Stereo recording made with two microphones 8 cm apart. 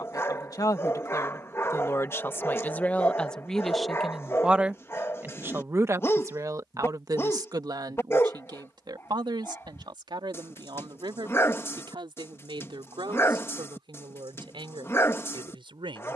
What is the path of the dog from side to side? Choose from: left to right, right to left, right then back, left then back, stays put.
stays put.